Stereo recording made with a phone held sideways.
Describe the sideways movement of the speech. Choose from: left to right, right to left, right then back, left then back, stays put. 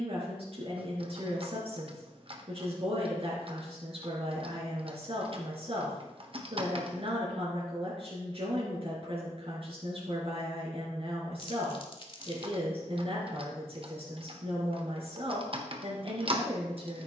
stays put.